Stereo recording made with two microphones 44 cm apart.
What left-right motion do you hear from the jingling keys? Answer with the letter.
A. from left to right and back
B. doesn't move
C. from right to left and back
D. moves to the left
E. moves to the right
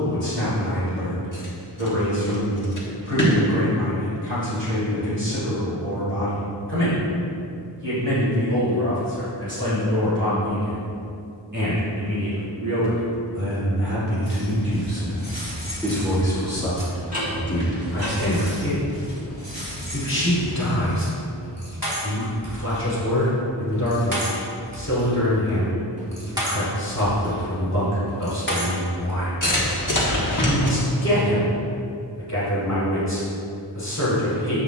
A.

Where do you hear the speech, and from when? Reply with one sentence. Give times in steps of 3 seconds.
In this clip you hear the speech on the right from 0 s, in the centre from 15 s and on the left from 18 s.